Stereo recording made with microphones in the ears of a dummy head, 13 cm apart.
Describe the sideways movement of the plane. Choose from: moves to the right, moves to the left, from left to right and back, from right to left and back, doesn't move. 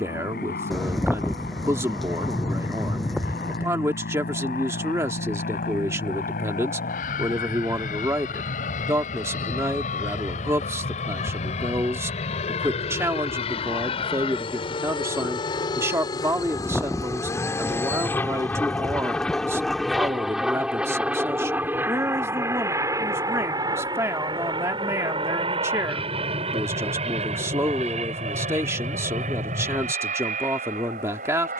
moves to the right.